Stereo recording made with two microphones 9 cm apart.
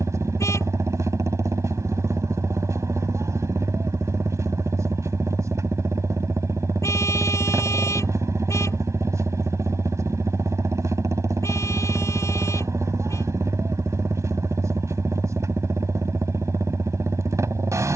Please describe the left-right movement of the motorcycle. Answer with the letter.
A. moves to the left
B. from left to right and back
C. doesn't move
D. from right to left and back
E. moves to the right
C.